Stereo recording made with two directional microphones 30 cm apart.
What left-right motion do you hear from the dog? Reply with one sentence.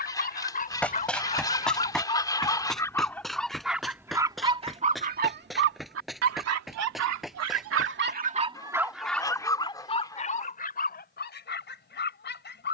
In this clip you hear the dog move from left to right and back again.